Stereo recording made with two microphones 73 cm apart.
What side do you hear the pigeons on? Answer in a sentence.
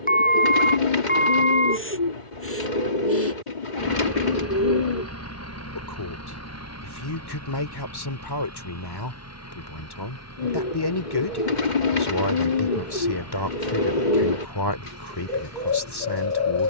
You can hear the pigeons on the left.